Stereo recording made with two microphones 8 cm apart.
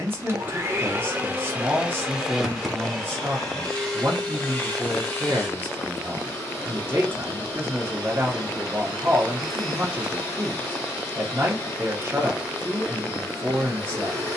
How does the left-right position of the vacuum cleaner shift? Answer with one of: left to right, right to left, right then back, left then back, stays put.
right to left.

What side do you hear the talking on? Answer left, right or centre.
right.